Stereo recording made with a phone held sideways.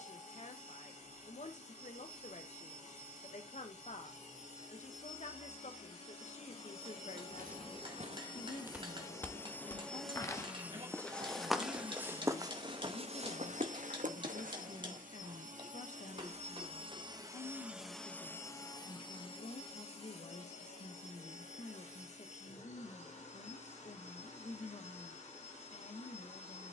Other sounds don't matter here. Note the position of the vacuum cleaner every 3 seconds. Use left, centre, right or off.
left, left, left, centre, right, right, left, left, left.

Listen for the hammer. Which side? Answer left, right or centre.
right.